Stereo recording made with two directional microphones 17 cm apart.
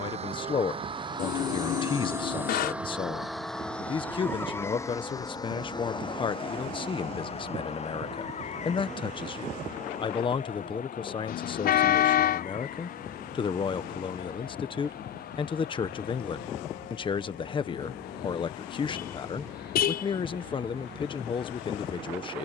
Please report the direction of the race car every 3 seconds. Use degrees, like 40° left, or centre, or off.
20° right, 10° left, 40° left, 50° left, 60° left, 60° left, 60° left, 60° left.